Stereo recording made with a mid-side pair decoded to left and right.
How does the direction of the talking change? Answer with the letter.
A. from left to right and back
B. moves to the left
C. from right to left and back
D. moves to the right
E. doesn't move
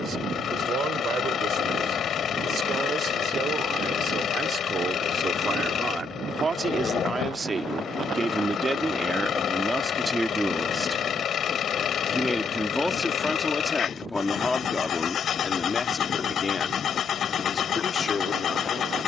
B.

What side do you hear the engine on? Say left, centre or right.
left.